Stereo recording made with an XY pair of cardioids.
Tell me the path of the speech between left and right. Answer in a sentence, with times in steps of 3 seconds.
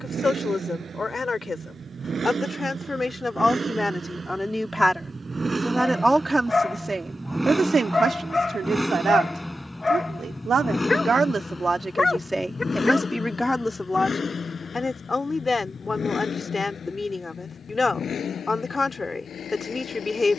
In this clip you hear the speech on the left from 0 s, in the centre from 3 s, on the right from 6 s, in the centre from 12 s and on the left from 15 s.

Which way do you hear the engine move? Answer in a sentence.
You can hear the engine move to the left.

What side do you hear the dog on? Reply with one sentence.
You can hear the dog on the left.